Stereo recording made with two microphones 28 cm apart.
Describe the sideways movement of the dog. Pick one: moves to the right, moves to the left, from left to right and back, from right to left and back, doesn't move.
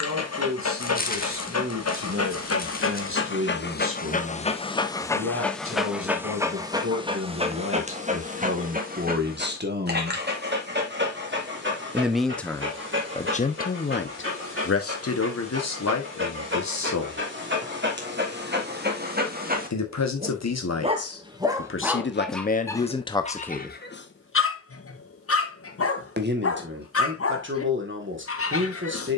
from left to right and back.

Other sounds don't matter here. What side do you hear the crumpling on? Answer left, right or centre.
left.